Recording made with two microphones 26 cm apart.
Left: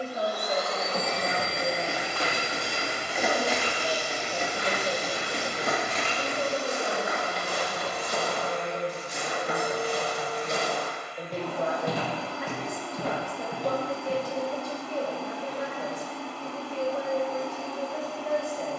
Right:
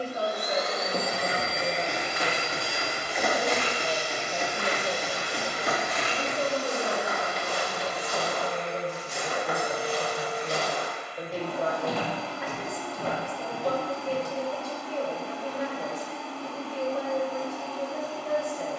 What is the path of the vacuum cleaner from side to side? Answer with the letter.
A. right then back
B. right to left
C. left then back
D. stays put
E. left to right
B.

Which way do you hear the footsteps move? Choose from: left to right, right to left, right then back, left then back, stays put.
right to left.